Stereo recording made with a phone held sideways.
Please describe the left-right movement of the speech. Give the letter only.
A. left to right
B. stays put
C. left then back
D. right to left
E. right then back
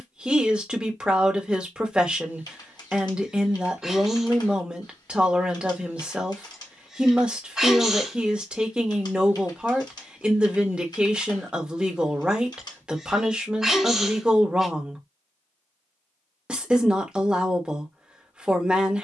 B.